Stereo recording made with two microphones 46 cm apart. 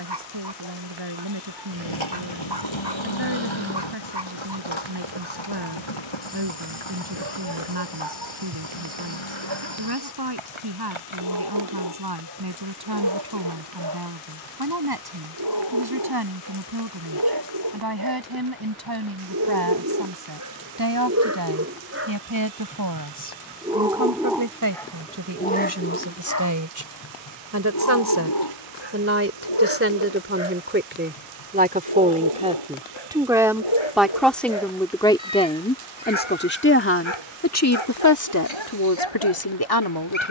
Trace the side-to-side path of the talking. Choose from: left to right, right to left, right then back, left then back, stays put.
right to left.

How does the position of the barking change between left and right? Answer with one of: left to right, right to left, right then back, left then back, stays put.
right to left.